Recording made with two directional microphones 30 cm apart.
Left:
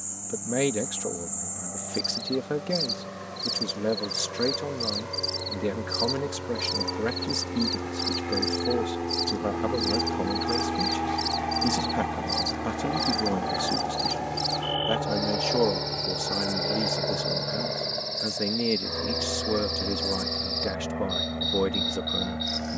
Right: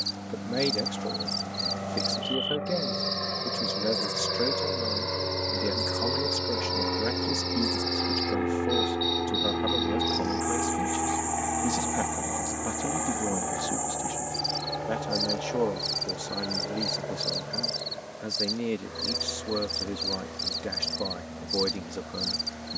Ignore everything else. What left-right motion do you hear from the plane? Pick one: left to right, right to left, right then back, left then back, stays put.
right to left.